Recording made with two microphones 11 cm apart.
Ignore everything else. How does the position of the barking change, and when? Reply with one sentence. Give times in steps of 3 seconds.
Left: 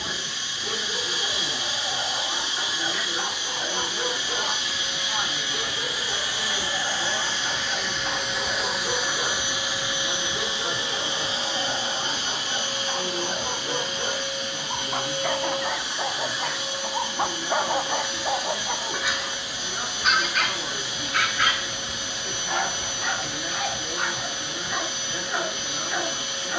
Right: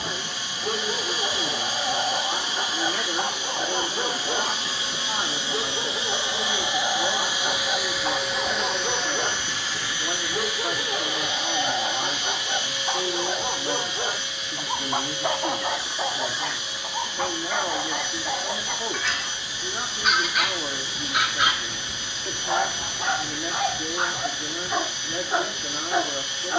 In this clip you hear the barking on the right from 0 s, in the centre from 15 s and on the right from 21 s.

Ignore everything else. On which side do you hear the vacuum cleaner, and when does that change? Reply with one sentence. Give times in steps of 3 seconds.
In this clip you hear the vacuum cleaner on the right from 0 s, in the centre from 6 s and on the left from 9 s.